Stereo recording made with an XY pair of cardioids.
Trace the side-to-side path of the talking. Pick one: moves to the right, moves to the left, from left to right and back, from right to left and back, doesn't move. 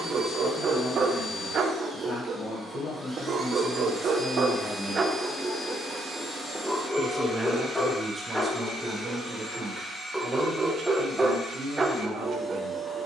moves to the right.